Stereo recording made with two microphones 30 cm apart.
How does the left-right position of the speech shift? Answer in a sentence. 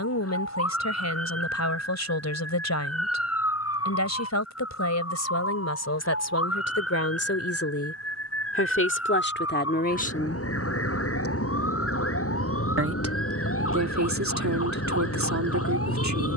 You can hear the speech move to the right.